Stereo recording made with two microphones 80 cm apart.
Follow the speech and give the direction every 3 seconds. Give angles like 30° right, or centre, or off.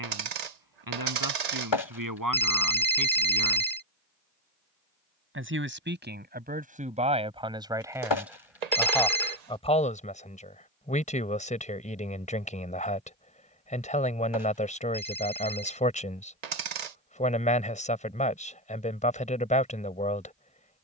30° right, 20° right, 10° right, 10° left, 10° left, 10° left, 10° left.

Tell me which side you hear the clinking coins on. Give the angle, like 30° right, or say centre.
60° right.